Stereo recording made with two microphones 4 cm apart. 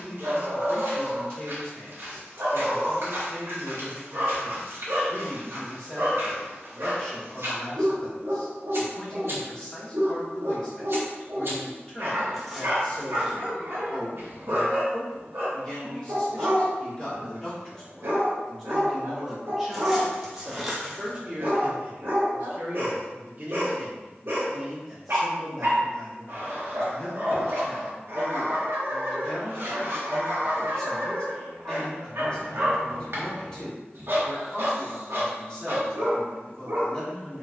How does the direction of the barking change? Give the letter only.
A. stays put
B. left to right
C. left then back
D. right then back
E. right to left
A.